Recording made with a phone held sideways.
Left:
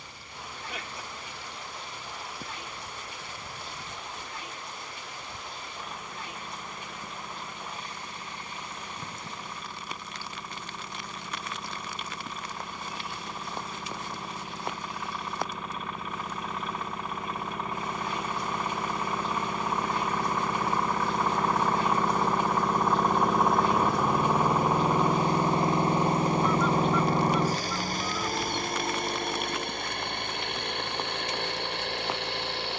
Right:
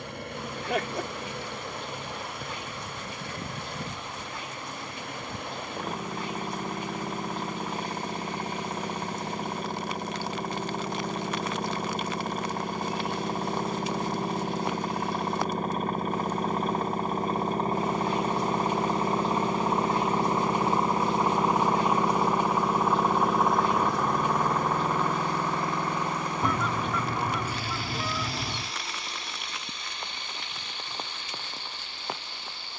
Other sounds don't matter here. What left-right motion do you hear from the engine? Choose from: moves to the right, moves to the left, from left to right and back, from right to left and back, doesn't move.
moves to the left.